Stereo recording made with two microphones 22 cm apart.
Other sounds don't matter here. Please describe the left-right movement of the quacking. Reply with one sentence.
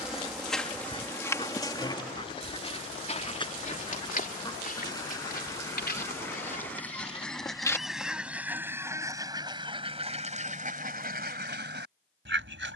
In this clip you hear the quacking move from left to right.